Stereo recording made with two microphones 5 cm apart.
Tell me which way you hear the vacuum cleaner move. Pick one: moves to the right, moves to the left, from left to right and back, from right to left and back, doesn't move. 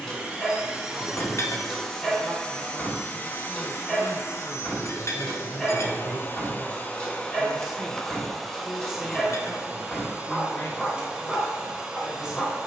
from right to left and back.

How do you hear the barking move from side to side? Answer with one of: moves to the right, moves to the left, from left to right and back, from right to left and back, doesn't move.
doesn't move.